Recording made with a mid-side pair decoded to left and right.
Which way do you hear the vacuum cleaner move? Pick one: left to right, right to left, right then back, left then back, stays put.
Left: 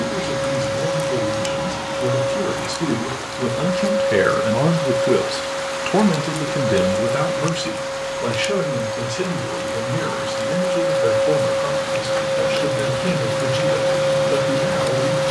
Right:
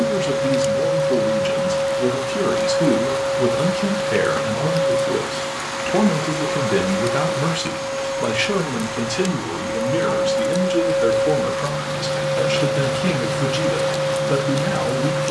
right then back.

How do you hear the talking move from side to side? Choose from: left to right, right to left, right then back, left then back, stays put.
left then back.